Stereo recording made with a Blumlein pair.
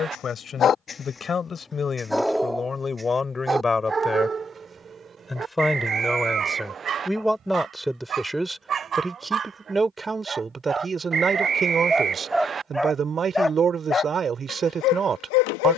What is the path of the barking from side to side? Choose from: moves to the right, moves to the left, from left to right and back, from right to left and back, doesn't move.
from left to right and back.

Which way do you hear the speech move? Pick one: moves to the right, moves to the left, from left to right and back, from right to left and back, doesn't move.
moves to the right.